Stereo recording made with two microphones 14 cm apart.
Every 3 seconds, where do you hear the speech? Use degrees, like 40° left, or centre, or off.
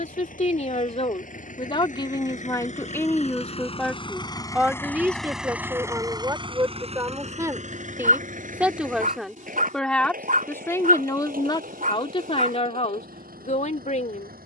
40° left, 10° right, 20° right, 20° left, 50° left.